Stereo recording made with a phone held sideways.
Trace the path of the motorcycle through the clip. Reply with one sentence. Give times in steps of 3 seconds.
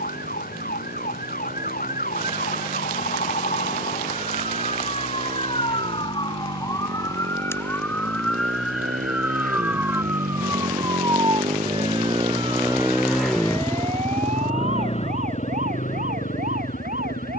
In this clip you hear the motorcycle on the right from 0 s, in the centre from 12 s and on the left from 15 s.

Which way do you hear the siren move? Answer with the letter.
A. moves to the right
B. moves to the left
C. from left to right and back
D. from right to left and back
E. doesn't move
A.